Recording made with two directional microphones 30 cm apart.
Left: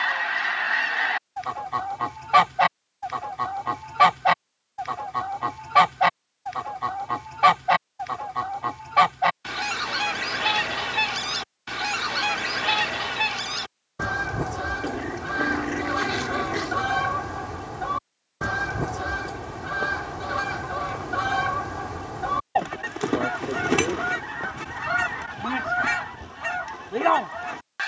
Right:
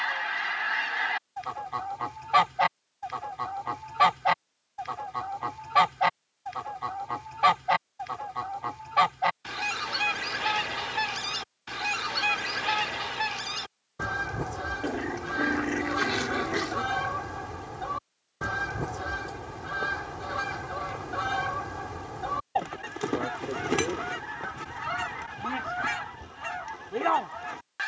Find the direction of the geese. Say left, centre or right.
left.